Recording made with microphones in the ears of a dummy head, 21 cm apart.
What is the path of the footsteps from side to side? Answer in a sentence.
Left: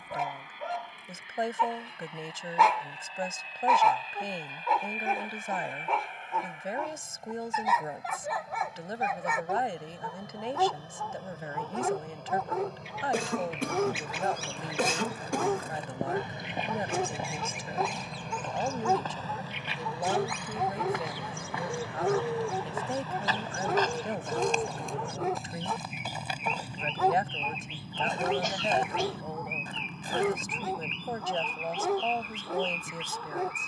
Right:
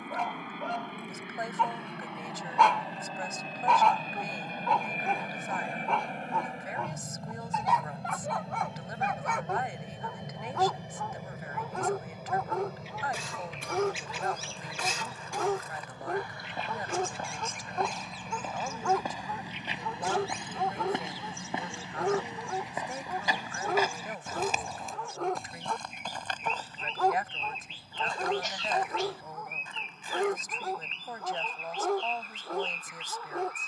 You can hear the footsteps go right and come back.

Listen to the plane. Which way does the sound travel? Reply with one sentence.
In this clip you hear the plane move to the left.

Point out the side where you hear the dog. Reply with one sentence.
You can hear the dog in the centre.